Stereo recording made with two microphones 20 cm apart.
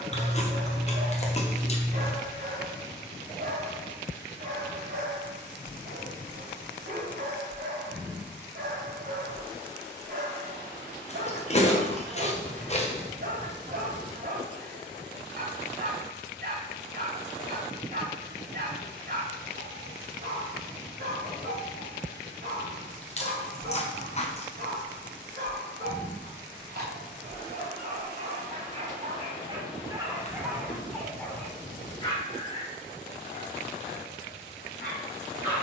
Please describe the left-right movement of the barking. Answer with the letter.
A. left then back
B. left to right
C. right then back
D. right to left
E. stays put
D.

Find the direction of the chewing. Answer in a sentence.
You can hear the chewing on the left.